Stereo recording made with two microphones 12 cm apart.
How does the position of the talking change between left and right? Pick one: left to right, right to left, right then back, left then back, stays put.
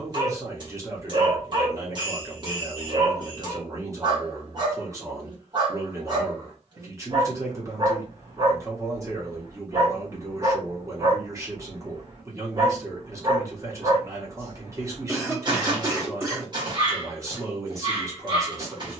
stays put.